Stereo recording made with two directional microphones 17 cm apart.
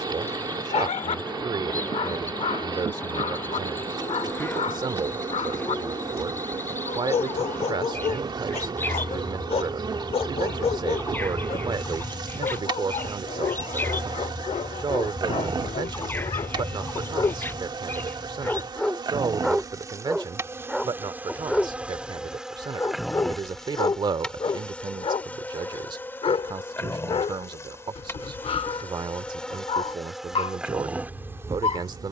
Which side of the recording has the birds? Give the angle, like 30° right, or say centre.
10° left.